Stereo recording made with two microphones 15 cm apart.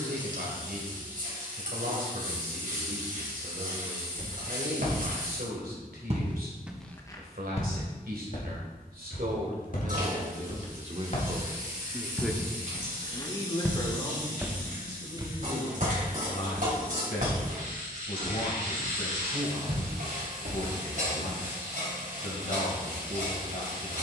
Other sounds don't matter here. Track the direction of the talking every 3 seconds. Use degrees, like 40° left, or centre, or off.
70° right, 70° right, 70° right, 50° right, 20° left, 50° left, 60° left, 60° left.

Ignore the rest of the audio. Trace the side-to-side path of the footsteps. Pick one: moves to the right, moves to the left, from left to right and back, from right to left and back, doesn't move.
from right to left and back.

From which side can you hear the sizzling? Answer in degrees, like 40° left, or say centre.
60° right.